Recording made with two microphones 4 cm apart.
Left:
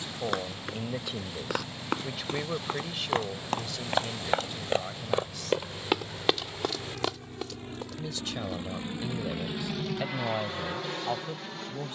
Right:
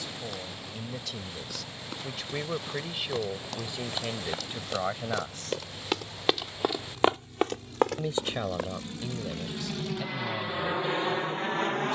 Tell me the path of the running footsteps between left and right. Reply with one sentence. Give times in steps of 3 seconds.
In this clip you hear the running footsteps on the left from 0 s, on the right from 6 s and not at all from 9 s.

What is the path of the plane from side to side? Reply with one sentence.
In this clip you hear the plane travel towards the right.